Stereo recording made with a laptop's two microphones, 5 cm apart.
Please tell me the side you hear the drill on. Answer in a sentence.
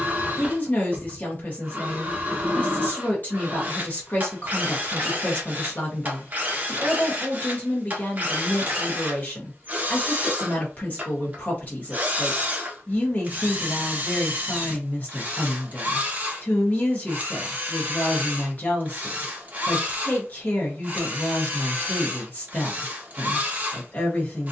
You can hear the drill on the right.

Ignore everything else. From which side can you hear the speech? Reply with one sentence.
You can hear the speech on the left.